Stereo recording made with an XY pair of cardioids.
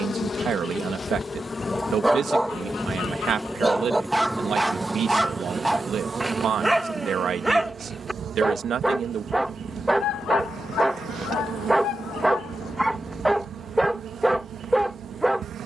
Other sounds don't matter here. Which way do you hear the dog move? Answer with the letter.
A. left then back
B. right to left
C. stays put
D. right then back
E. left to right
C.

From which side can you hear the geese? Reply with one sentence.
In this clip you hear the geese on the left.